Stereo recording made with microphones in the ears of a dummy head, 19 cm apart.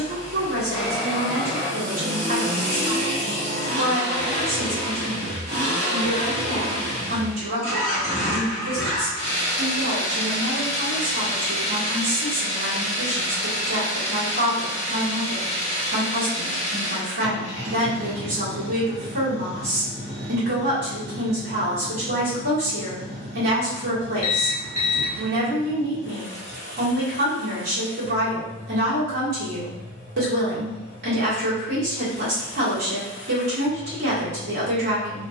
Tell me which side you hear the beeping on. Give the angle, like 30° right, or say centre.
30° left.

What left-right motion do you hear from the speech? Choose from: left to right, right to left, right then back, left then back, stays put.
stays put.